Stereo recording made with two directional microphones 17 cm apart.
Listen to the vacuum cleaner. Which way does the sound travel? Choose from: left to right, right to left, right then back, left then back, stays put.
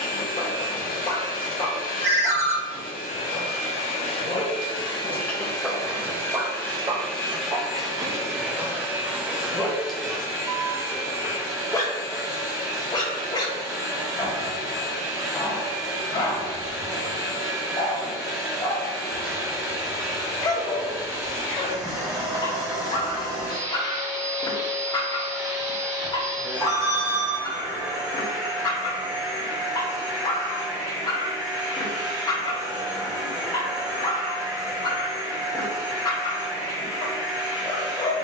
left to right.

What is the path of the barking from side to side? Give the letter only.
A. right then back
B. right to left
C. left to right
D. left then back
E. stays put
A.